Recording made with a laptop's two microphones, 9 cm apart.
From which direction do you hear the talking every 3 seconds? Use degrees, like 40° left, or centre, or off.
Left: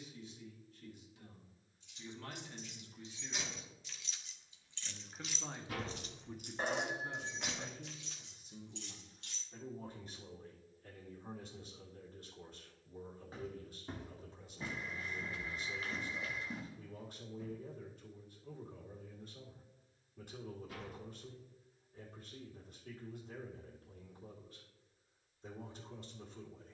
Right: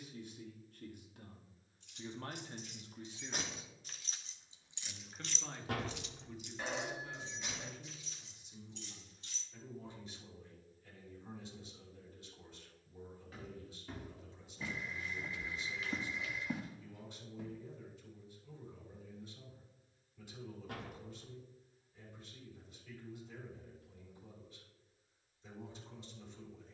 50° right, 10° right, 30° left, 50° left, 50° left, 50° left, 50° left, 50° left, 50° left.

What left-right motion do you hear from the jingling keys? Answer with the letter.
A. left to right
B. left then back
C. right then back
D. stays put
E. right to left
E.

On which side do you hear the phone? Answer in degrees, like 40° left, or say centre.
40° left.